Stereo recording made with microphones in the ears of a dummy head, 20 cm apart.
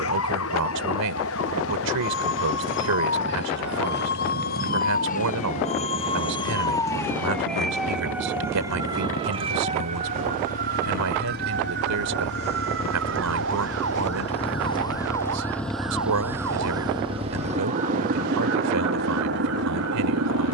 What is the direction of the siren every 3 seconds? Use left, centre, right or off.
left, left, centre, right, right, right, right.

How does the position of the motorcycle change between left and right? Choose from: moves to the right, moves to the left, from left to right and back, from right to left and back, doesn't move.
moves to the right.